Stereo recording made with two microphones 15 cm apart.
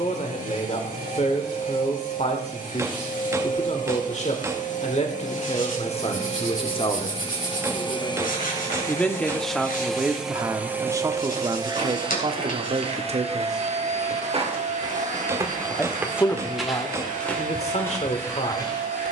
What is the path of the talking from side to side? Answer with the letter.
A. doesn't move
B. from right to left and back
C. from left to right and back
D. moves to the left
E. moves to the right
C.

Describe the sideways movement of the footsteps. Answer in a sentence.
You can hear the footsteps travel towards the left.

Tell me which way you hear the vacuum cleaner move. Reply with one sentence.
You can hear the vacuum cleaner go from the left side to the right.